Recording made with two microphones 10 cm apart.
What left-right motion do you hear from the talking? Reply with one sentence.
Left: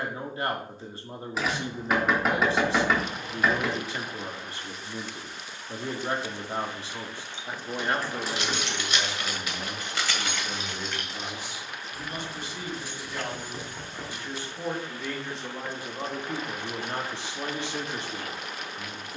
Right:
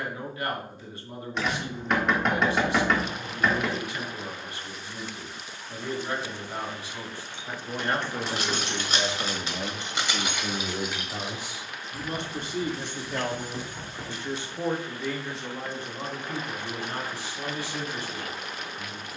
In this clip you hear the talking go right and come back.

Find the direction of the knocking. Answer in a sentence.
In this clip you hear the knocking in the centre.